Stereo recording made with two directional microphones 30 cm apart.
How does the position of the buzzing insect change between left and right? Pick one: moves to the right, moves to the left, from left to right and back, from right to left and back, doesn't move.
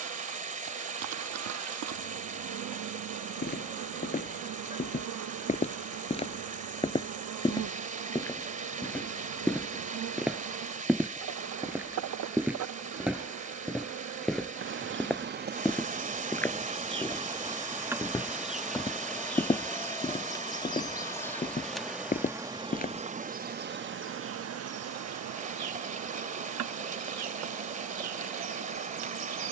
from right to left and back.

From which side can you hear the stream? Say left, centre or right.
right.